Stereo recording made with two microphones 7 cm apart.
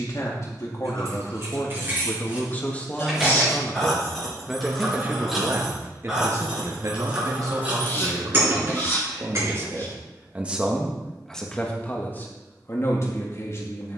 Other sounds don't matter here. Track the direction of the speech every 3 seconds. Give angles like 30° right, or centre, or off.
40° left, 10° right, 50° right, 10° right, 40° left.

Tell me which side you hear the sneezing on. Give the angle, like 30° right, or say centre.
30° left.